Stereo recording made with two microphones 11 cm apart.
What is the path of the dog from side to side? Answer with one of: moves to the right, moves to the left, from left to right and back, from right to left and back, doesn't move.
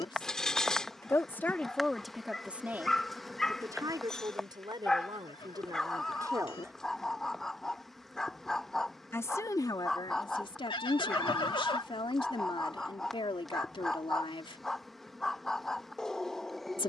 doesn't move.